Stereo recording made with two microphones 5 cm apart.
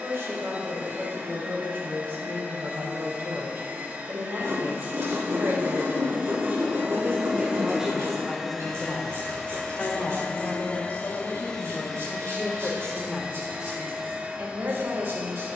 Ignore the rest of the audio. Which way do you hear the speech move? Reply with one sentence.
In this clip you hear the speech move from right to left and back again.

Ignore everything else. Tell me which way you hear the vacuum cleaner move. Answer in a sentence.
In this clip you hear the vacuum cleaner move from right to left and back again.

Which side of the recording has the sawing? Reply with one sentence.
In this clip you hear the sawing on the right.